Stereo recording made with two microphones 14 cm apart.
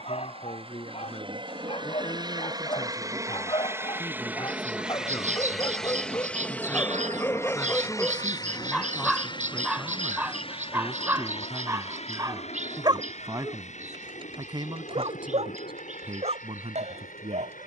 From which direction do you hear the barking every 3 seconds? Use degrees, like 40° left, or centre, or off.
40° left, 30° left, 10° left, 10° right, 30° right, 50° right.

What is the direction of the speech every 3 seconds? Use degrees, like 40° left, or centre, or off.
40° left, 30° left, 10° left, centre, 30° right, 40° right.